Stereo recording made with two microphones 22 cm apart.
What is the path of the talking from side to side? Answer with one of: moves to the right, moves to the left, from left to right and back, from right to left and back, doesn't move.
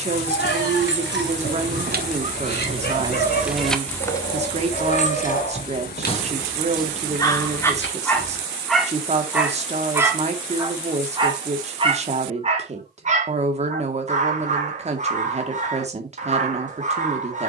doesn't move.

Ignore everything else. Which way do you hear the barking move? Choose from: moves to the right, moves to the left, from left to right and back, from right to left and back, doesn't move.
moves to the right.